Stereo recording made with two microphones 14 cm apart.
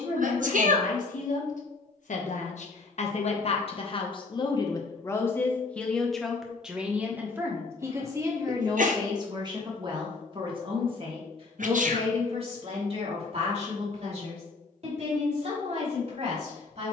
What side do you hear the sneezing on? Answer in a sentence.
You can hear the sneezing on the right.